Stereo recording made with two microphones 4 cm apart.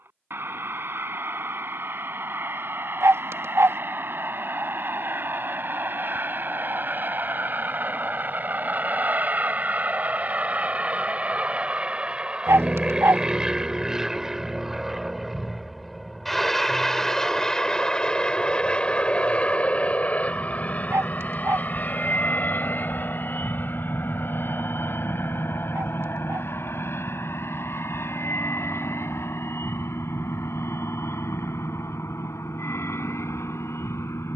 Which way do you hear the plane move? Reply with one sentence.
In this clip you hear the plane move to the left.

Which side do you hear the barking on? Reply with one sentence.
In this clip you hear the barking on the right.